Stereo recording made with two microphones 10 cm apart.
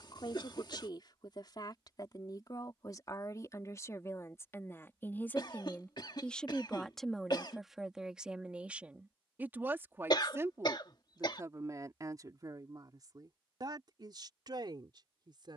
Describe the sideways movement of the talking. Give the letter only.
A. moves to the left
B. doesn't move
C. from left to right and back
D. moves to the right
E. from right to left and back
D.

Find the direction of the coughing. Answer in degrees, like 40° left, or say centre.
50° left.